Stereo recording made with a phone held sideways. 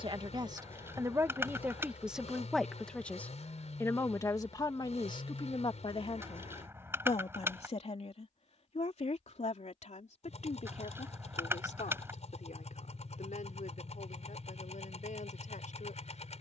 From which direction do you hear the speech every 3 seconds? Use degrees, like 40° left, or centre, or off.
10° right, 30° left, 50° left, 60° left, 60° left, 70° left.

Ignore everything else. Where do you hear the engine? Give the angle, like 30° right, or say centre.
50° left.